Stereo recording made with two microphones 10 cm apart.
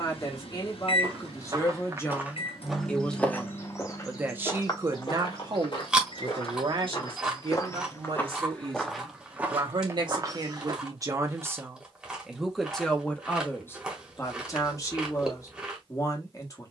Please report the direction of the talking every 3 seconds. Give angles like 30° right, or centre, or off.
30° left, 20° right, 60° right, 40° right, 20° left, 40° left.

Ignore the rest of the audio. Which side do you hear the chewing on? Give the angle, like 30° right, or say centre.
10° right.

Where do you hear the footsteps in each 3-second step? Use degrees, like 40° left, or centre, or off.
20° right, 40° left, 30° left, 30° right, off, off.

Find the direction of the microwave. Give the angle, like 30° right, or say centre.
70° left.